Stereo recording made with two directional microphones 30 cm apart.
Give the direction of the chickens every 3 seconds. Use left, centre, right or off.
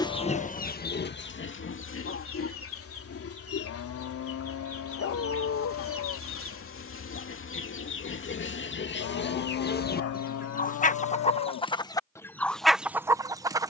left, left, left, left, centre.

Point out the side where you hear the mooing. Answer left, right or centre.
left.